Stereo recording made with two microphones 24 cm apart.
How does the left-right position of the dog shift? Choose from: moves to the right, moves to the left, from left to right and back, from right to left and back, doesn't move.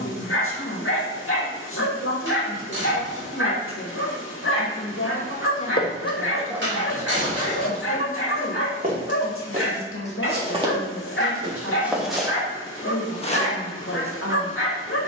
doesn't move.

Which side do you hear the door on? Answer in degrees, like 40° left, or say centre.
50° right.